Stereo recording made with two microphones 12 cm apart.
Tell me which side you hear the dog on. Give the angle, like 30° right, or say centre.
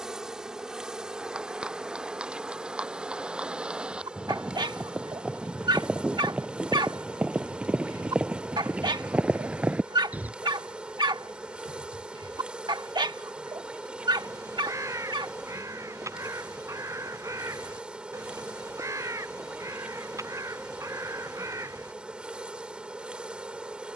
40° right.